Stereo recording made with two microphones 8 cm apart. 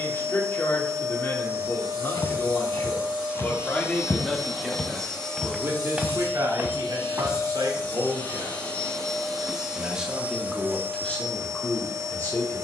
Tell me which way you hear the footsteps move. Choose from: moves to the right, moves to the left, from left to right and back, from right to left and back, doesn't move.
moves to the right.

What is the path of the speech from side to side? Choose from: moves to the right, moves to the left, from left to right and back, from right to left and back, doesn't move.
from left to right and back.